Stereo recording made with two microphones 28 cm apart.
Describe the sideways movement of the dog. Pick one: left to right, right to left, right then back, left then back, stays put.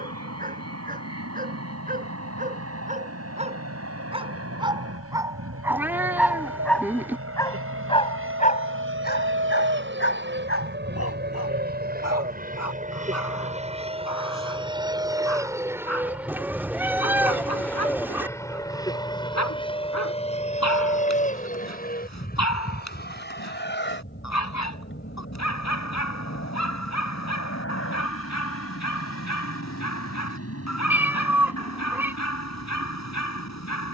right to left.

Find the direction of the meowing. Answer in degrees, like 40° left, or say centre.
10° right.